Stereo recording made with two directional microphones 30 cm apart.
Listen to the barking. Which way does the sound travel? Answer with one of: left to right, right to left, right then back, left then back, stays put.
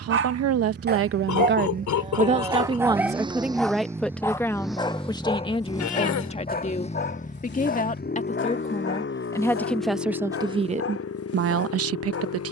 right to left.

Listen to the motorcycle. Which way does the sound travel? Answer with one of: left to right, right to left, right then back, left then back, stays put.
right to left.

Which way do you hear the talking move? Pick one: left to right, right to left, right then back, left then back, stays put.
left then back.